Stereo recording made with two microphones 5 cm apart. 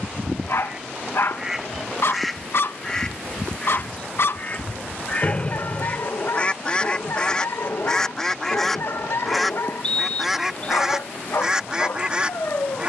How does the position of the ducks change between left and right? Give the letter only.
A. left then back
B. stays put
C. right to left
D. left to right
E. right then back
A.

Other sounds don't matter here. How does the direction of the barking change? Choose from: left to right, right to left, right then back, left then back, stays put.
stays put.